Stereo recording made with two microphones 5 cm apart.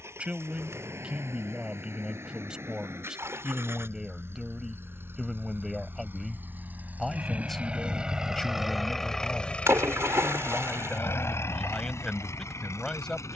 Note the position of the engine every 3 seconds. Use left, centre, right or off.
right, right, right, left, left.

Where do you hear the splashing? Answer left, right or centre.
right.